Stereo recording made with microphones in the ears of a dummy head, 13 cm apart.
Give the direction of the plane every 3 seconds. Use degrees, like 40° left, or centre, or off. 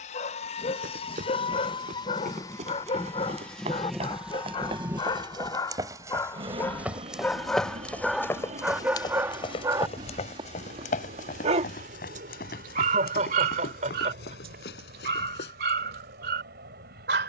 40° left, 10° right, 40° right, 50° right, 60° right, 60° right.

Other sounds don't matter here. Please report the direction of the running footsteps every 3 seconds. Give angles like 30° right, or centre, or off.
50° right, 40° right, centre, 50° left, 70° left, 80° left.